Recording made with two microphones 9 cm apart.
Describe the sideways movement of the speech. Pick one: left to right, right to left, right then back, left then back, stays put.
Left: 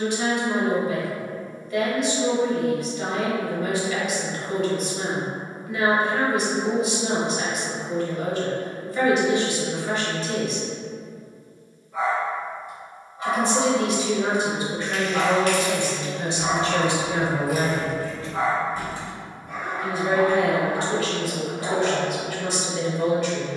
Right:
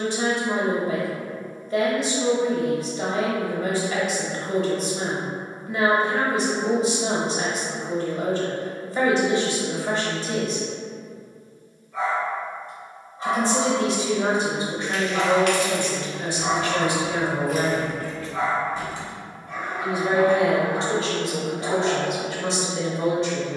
left then back.